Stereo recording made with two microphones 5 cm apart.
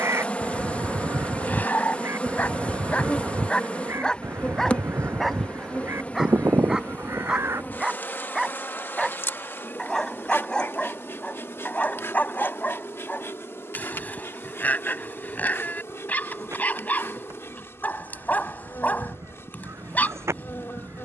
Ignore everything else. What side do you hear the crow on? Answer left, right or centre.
right.